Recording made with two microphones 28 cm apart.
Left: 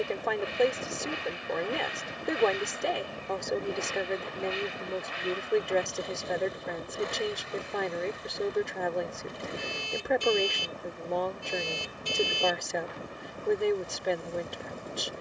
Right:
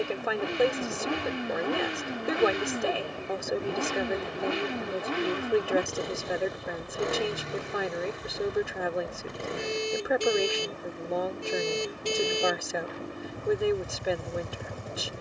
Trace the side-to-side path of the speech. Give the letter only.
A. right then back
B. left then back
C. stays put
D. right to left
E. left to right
C.